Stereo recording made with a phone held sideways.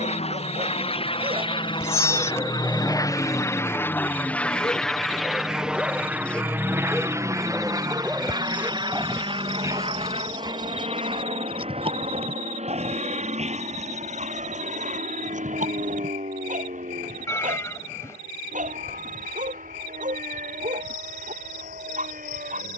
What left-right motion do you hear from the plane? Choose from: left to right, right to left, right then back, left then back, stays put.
left to right.